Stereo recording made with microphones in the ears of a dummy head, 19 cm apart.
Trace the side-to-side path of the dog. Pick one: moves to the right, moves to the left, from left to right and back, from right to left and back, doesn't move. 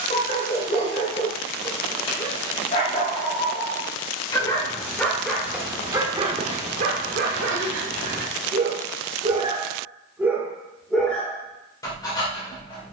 from left to right and back.